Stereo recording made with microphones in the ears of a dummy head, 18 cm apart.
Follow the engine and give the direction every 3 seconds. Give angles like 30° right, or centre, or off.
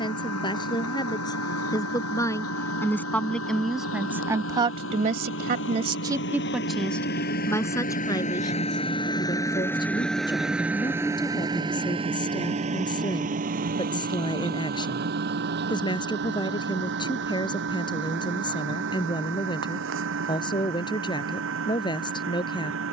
80° left, 70° left, 40° left, centre, 40° right, 60° right, 60° right, 70° right.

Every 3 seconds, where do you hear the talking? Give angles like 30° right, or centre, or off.
20° left, 20° right, 10° left, 20° left, 20° left, 20° left, 20° left, 20° left.